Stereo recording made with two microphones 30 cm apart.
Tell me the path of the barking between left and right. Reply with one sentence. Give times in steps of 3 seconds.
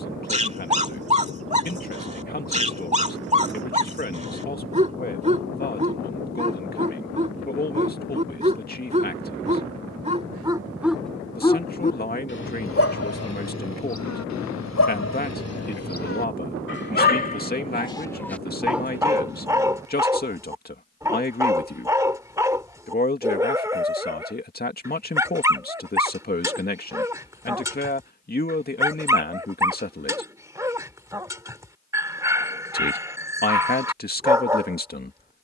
In this clip you hear the barking on the right from 0 s, in the centre from 9 s, on the left from 12 s and in the centre from 18 s.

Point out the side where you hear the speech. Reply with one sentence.
You can hear the speech on the left.